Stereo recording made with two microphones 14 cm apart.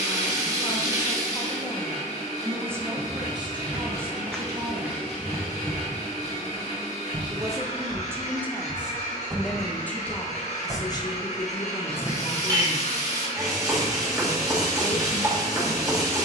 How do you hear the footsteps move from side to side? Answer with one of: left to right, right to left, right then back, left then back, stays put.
right then back.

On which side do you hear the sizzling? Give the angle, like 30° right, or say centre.
20° right.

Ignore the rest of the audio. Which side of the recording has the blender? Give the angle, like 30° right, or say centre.
60° left.